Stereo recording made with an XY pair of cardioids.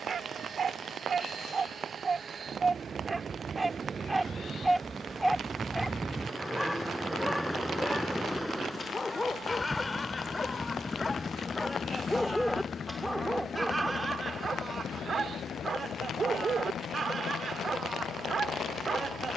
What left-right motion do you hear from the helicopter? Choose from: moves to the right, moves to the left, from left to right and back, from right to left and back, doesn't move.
moves to the left.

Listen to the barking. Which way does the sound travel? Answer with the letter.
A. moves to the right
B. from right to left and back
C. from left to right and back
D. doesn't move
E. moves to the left
B.